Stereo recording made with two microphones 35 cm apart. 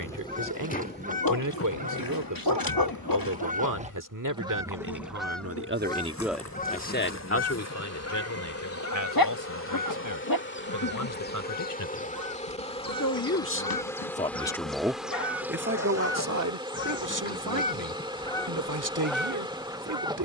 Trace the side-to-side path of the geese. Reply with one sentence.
You can hear the geese move from right to left and back again.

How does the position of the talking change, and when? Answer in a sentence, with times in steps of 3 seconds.
You can hear the talking on the right from 0 s, on the left from 6 s and on the right from 15 s.